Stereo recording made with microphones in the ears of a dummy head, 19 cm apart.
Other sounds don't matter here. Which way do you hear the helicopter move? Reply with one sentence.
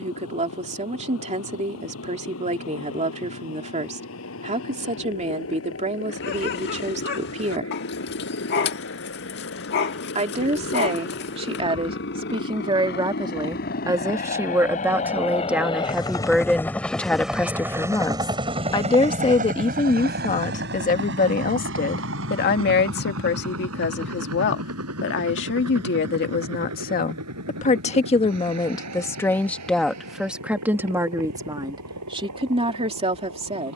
You can hear the helicopter move to the right.